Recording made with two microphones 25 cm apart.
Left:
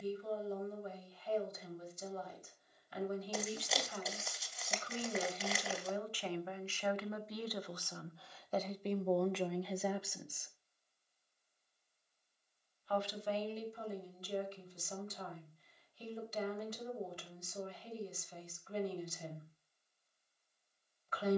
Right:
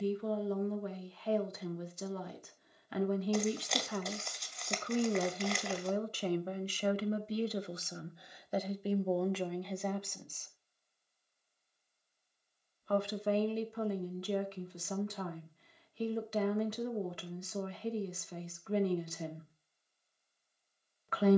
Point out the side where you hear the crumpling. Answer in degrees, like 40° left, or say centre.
centre.